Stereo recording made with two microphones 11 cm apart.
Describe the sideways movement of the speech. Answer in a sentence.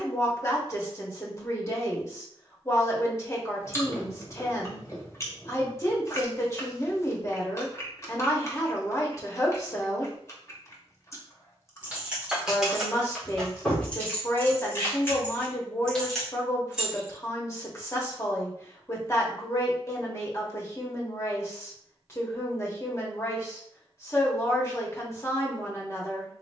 In this clip you hear the speech stay put.